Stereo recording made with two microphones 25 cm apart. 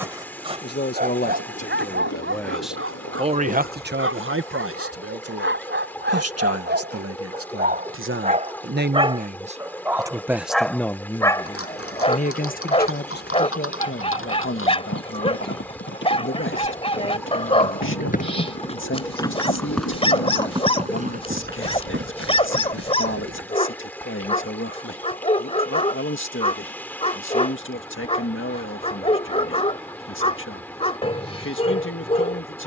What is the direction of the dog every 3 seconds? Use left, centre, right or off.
right, right, right, centre, left, left, left, left, left, left, left.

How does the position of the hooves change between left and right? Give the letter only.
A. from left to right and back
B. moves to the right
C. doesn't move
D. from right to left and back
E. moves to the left
B.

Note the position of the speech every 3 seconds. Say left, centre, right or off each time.
left, right, right, centre, left, left, left, left, left, left, left.